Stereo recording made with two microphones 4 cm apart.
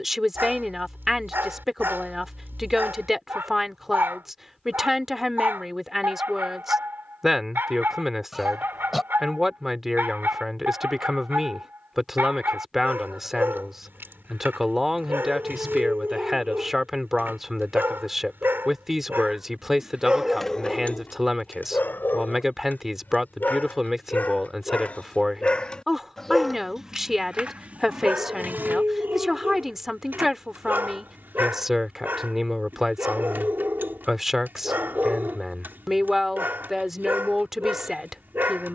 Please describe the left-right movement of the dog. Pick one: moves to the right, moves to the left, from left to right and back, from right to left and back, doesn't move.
from right to left and back.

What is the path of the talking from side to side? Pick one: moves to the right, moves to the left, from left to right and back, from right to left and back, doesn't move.
doesn't move.